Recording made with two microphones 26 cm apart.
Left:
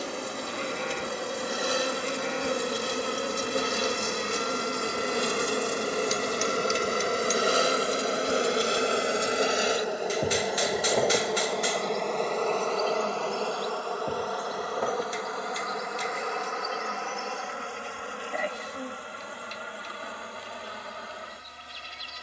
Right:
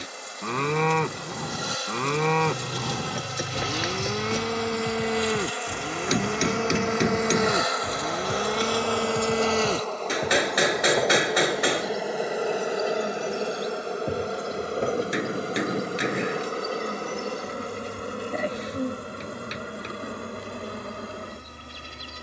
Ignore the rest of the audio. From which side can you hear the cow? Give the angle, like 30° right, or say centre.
80° right.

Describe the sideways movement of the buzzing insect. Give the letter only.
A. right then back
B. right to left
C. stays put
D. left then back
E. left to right
E.